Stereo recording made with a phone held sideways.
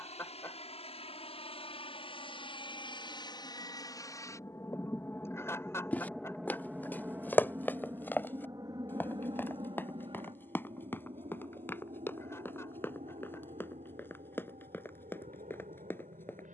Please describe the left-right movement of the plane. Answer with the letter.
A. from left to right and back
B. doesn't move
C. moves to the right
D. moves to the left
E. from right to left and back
C.